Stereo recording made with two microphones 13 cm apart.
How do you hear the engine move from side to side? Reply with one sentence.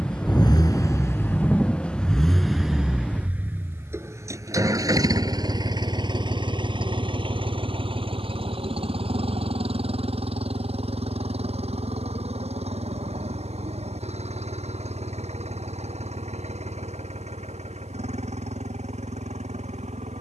In this clip you hear the engine travel towards the right.